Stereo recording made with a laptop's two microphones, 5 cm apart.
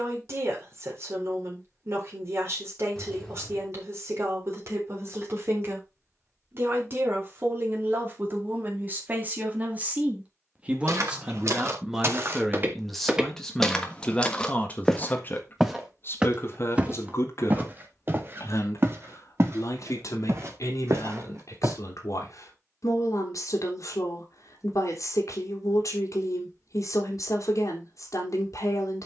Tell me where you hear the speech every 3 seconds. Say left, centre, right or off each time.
right, right, right, right, centre, left, left, left, left, left.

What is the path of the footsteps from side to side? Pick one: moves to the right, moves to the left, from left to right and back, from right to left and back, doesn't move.
from right to left and back.